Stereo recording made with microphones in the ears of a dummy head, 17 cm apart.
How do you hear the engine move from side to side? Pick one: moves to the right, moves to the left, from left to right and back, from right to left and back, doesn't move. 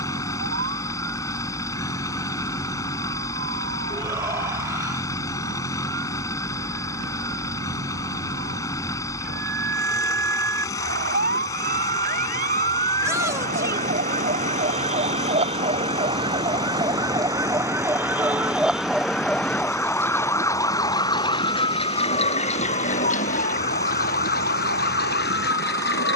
doesn't move.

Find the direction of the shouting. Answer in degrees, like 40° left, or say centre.
20° right.